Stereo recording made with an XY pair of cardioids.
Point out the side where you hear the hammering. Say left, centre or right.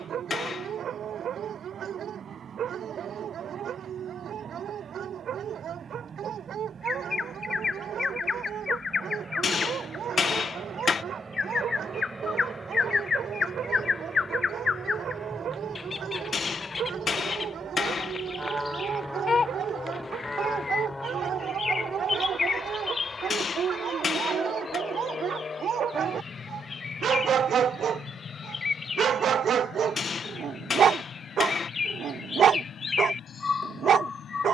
left.